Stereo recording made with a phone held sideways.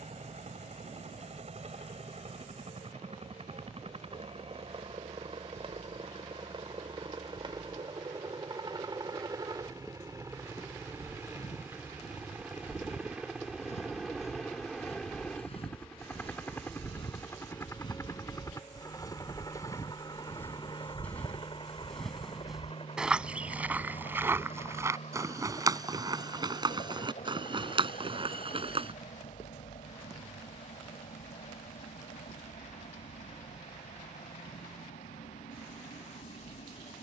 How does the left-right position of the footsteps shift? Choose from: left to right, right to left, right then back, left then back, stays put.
left to right.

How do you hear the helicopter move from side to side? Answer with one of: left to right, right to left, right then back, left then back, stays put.
right to left.